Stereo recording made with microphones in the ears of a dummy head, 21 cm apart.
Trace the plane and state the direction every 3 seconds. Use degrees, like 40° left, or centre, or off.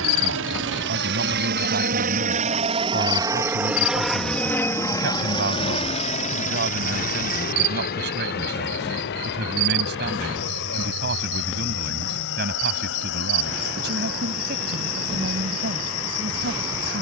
40° right, 10° left, 40° left, 50° left, 60° left, 60° left.